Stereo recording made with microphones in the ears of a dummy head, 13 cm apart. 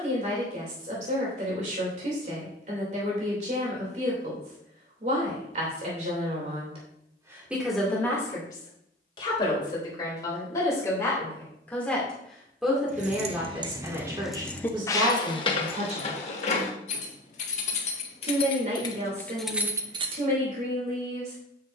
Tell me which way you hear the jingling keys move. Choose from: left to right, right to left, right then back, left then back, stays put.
left then back.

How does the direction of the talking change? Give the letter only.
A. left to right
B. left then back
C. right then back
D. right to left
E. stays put
B.